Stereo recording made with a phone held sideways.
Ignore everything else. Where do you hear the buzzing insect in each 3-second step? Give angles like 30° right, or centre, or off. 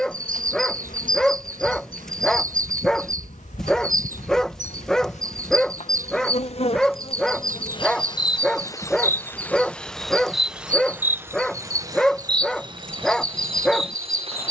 70° left, 60° left, 40° left, centre, 40° right.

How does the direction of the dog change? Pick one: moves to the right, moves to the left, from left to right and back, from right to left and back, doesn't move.
doesn't move.